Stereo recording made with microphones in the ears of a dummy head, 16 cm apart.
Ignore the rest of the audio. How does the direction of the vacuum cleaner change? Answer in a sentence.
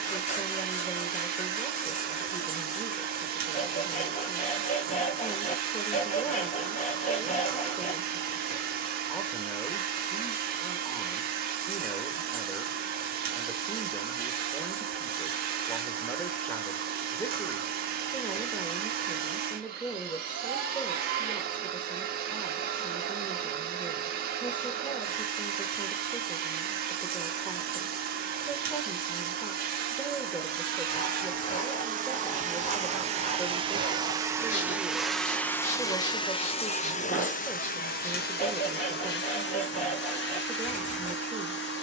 You can hear the vacuum cleaner move from right to left.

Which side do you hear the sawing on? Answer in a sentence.
In this clip you hear the sawing on the left.